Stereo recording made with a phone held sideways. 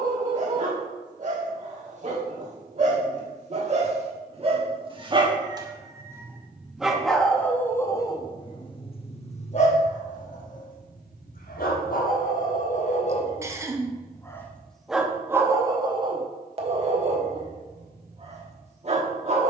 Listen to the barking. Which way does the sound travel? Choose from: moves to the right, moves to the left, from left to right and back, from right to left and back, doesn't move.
from right to left and back.